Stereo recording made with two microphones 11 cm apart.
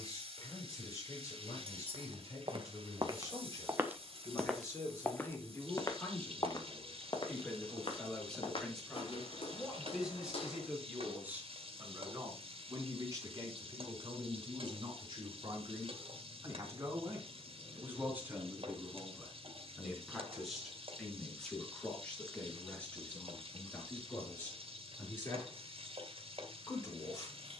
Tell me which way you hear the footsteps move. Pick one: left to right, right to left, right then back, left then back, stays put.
right to left.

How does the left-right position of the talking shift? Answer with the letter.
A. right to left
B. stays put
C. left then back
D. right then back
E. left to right
D.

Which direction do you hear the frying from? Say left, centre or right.
right.